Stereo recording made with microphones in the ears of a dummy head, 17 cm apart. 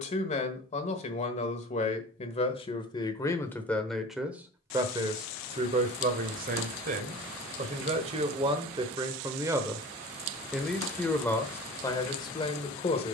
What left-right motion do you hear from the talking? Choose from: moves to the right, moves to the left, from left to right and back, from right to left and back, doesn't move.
from left to right and back.